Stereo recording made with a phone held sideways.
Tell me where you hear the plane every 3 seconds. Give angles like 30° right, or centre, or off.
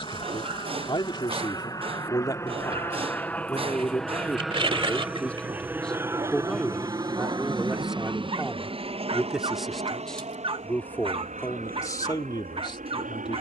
30° left, centre, 30° right, 50° right, 60° right.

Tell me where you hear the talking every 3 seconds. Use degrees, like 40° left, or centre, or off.
30° left, 10° left, centre, 10° left, 30° left.